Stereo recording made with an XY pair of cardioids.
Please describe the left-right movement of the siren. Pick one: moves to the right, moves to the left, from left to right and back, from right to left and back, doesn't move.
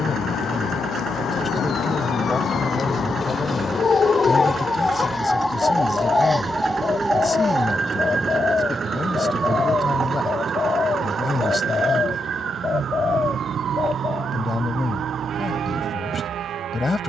moves to the right.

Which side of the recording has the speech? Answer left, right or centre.
left.